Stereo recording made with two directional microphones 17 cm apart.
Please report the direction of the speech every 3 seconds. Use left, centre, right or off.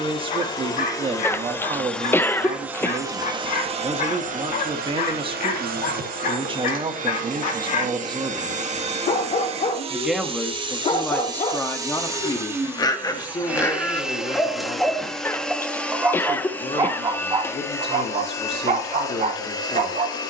right, right, right, centre, left, left, left.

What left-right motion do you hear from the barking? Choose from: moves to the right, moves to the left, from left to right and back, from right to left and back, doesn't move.
moves to the right.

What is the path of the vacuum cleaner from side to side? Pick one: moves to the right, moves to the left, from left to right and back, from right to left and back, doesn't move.
from left to right and back.